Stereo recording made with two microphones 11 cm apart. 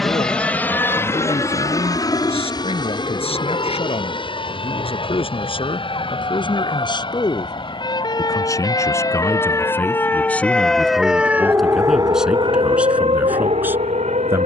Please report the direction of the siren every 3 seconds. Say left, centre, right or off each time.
left, left, left, centre, right.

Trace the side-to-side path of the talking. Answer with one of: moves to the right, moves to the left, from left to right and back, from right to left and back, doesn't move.
moves to the right.